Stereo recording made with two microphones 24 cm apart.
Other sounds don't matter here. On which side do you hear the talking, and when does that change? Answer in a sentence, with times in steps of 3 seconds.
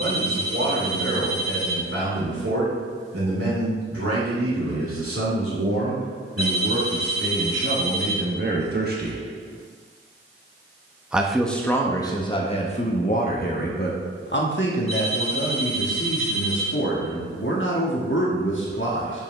In this clip you hear the talking on the right from 0 s, in the centre from 9 s and on the left from 12 s.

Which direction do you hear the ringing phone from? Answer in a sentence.
In this clip you hear the ringing phone on the left.